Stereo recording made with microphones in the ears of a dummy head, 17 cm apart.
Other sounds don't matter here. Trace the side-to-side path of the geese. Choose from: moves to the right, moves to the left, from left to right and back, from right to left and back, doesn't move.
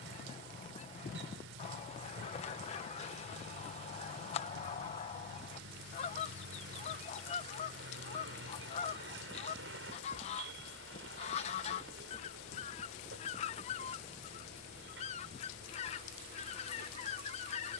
doesn't move.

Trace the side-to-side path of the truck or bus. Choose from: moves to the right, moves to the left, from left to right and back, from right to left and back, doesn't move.
doesn't move.